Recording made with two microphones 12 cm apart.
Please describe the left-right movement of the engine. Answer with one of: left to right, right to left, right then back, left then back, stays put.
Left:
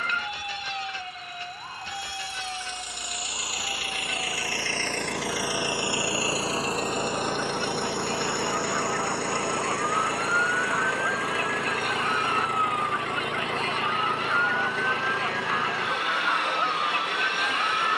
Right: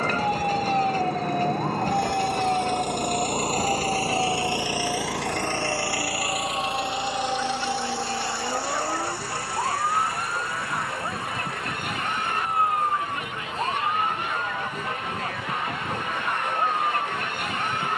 right to left.